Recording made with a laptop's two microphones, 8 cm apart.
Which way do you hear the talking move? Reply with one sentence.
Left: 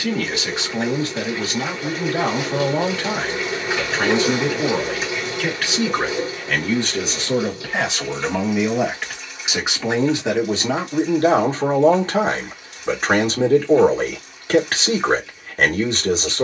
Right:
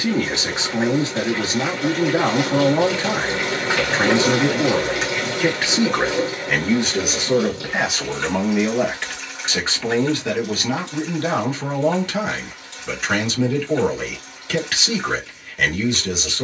You can hear the talking travel towards the left.